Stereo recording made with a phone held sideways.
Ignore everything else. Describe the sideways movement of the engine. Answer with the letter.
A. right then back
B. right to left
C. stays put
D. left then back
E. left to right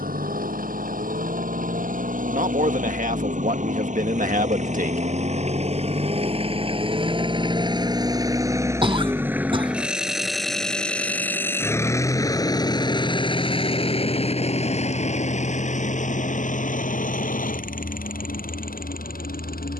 B.